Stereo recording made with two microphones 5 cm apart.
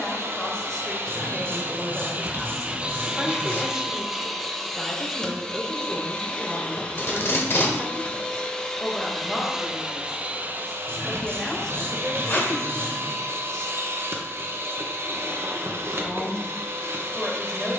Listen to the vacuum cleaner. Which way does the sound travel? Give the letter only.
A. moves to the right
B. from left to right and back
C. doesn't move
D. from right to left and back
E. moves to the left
D.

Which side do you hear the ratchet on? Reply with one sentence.
You can hear the ratchet on the right.